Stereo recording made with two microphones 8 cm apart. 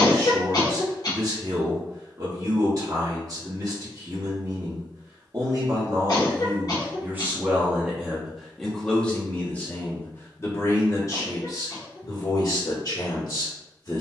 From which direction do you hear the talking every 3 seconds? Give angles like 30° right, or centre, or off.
40° right, 40° right, 20° right, 30° left, 50° left.